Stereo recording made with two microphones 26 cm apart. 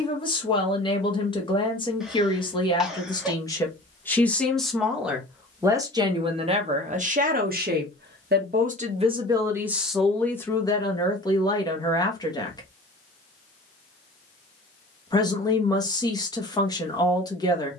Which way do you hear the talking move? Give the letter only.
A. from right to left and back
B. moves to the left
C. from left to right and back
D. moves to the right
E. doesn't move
C.